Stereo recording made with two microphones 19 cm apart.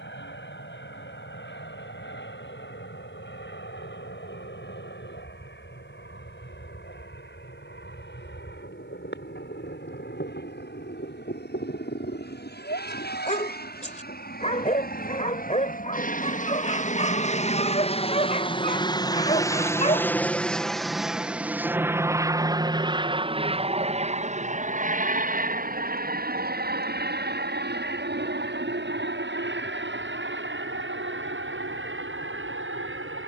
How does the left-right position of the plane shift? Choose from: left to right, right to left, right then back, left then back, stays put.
left to right.